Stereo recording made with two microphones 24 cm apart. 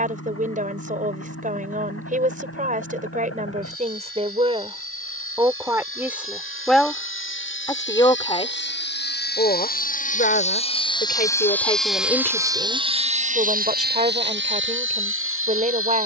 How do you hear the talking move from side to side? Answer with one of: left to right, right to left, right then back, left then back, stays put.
left then back.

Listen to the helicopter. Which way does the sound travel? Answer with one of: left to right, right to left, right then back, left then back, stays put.
left to right.